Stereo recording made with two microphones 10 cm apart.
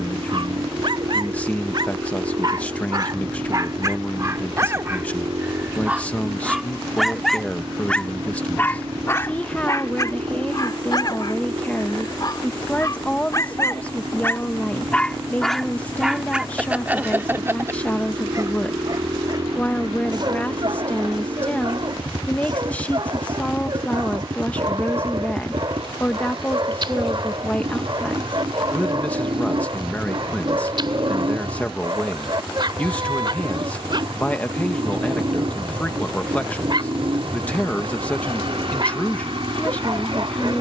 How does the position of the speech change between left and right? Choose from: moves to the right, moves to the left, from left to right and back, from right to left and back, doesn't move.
doesn't move.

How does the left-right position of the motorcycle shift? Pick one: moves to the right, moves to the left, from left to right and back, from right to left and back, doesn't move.
doesn't move.